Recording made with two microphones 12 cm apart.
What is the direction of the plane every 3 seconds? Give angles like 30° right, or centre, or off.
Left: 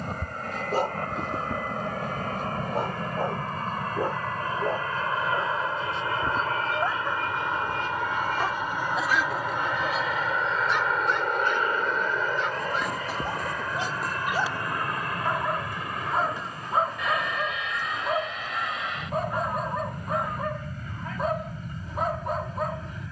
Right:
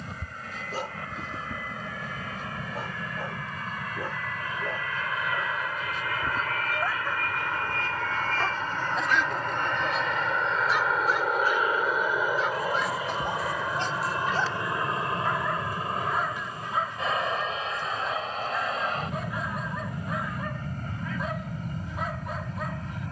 50° left, 40° left, 20° left, centre, 10° right, 30° right, 40° right, 40° right.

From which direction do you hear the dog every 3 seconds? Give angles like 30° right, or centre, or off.
60° left, 40° left, 20° left, centre, 10° left, 30° left, 40° left, 40° left.